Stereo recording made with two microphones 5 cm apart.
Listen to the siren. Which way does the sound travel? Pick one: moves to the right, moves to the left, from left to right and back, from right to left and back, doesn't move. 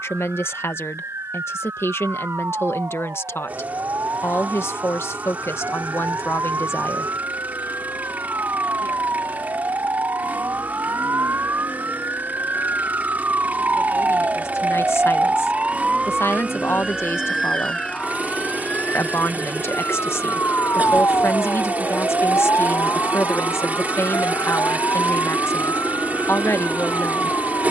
moves to the left.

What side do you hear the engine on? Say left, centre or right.
right.